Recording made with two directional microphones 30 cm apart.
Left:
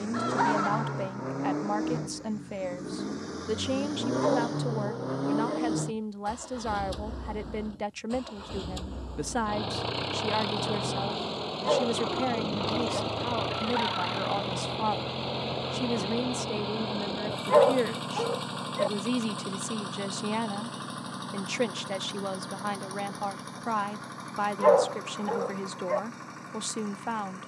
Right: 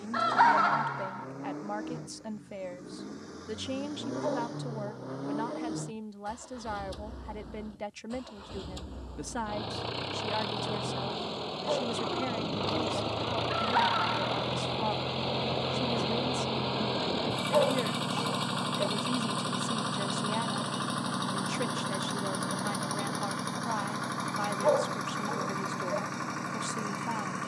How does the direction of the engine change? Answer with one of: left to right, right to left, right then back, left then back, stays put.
left to right.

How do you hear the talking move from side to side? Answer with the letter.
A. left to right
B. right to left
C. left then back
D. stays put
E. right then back
D.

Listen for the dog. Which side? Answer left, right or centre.
left.